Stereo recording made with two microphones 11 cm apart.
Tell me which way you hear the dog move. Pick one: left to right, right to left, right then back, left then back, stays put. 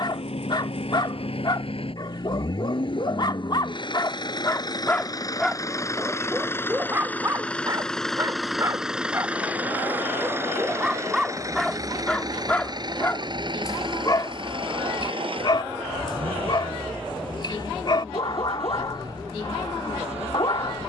right then back.